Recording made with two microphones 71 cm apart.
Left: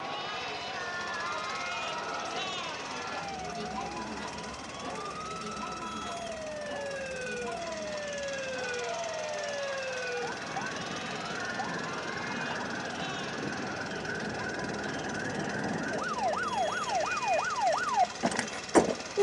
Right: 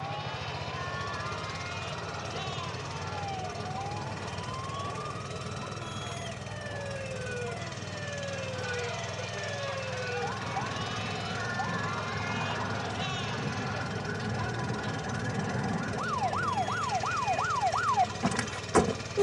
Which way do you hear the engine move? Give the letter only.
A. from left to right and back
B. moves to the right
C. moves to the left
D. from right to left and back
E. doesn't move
E.